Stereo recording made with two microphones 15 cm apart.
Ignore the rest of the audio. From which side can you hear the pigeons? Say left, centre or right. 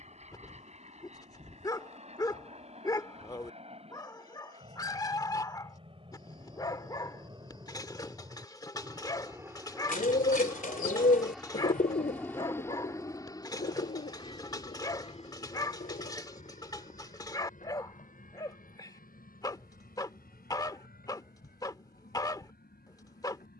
left.